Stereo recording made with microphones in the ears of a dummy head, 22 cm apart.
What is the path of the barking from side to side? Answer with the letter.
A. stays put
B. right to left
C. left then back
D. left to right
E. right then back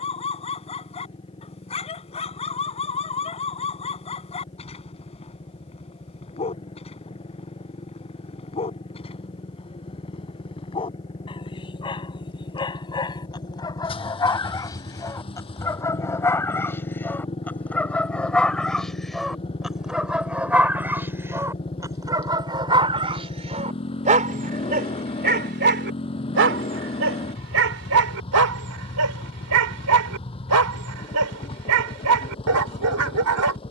D.